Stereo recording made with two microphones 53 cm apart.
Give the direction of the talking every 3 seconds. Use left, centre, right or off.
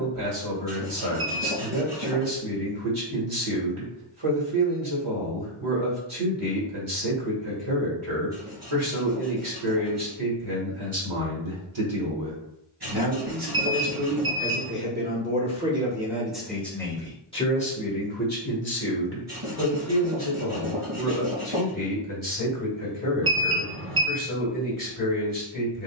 right, right, right, right, right, centre, left, left, left.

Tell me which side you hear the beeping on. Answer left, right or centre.
right.